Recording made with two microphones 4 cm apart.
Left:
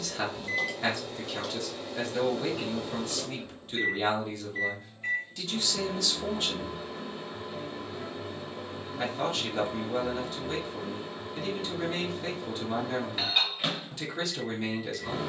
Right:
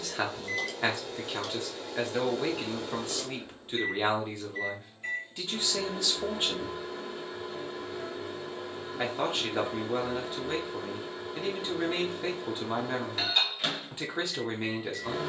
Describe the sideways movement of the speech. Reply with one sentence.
In this clip you hear the speech stay put.